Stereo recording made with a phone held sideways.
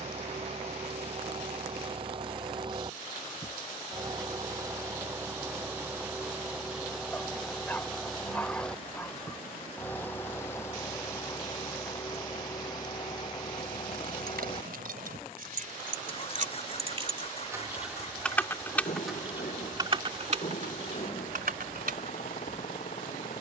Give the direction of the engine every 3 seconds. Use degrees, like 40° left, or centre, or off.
40° right, 20° right, centre, 20° left, 30° left, 40° left, 50° left, 50° left.